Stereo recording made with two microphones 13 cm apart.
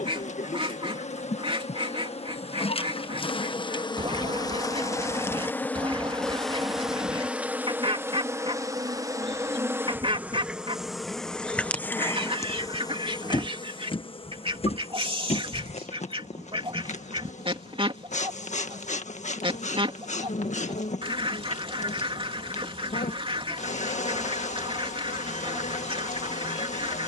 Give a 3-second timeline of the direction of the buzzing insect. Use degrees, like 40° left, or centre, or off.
50° left, 30° left, 10° right, 10° right, 30° left, 60° left, 60° left, 60° left, 60° left.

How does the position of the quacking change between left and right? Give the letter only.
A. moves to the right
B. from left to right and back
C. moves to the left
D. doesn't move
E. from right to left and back
D.